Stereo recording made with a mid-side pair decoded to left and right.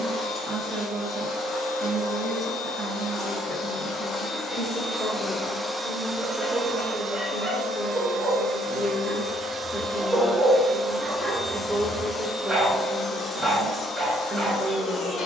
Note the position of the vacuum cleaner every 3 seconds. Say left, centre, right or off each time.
left, left, right, centre, left.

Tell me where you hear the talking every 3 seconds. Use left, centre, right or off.
right, right, centre, centre, right.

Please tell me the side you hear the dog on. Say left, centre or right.
centre.